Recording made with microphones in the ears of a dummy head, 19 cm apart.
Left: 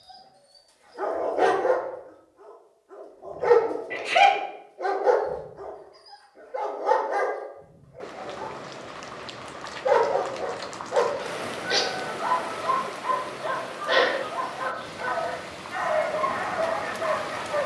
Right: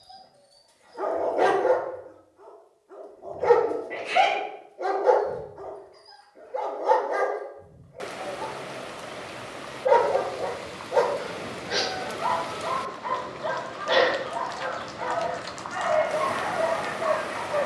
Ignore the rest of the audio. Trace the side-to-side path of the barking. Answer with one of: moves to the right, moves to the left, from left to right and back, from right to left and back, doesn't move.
doesn't move.